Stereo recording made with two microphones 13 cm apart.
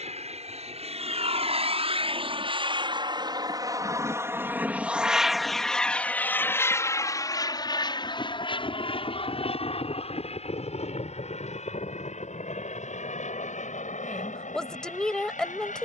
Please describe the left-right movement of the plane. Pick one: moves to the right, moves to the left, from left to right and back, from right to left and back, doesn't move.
moves to the left.